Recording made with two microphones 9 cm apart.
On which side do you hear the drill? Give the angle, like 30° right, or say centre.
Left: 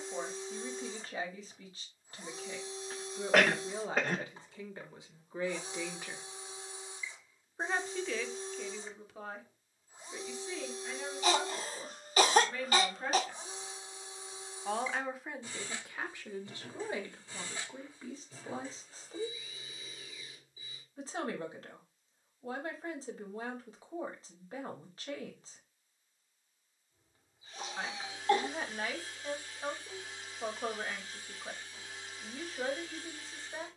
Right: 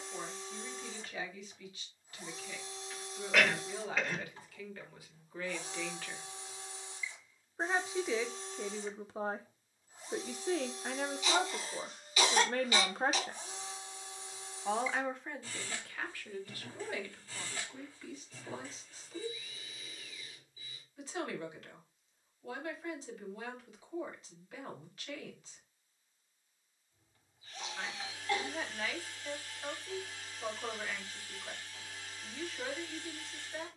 20° left.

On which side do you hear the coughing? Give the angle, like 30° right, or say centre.
40° left.